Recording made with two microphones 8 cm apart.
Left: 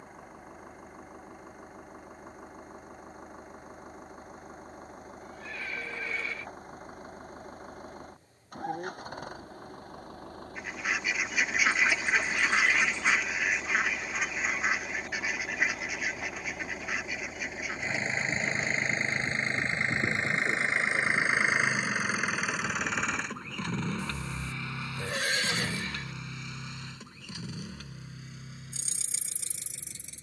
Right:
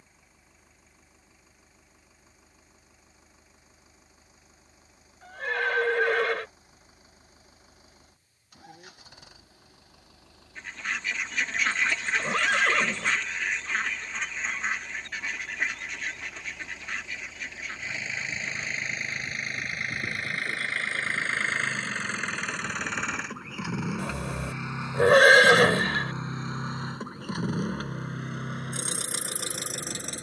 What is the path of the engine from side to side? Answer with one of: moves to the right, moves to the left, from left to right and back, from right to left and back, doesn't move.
moves to the right.